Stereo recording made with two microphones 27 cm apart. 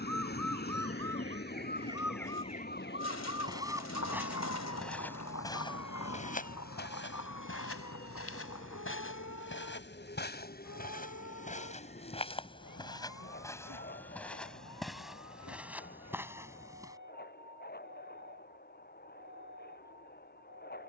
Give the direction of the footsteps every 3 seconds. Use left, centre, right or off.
off, centre, left, left, centre, centre, off.